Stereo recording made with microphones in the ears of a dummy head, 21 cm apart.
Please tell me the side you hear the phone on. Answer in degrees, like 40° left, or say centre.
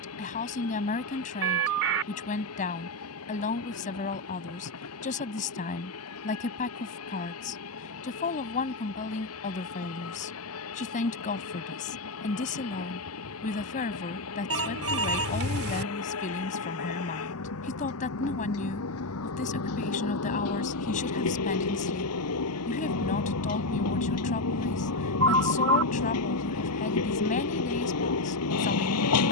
60° right.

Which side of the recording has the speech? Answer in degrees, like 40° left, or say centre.
30° left.